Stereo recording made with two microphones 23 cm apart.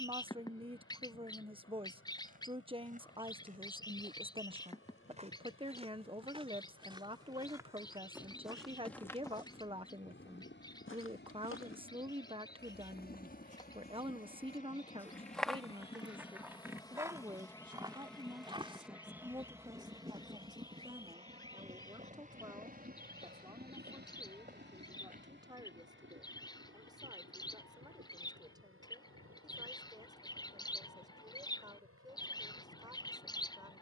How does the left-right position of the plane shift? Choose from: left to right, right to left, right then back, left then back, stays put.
left to right.